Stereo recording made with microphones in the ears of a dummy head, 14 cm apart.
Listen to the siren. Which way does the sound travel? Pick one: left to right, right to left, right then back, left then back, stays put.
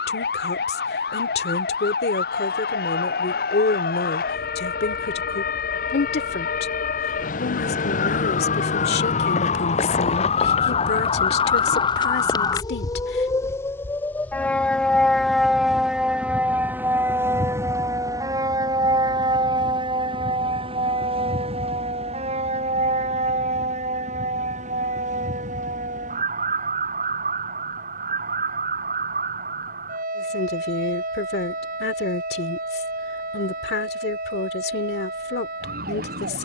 left to right.